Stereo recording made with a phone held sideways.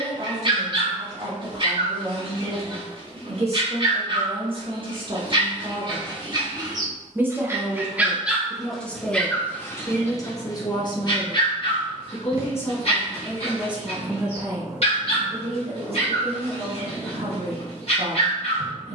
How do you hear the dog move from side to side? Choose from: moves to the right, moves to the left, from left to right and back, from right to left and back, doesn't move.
moves to the left.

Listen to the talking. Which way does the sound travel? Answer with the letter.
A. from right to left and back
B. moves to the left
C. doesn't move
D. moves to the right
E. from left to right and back
A.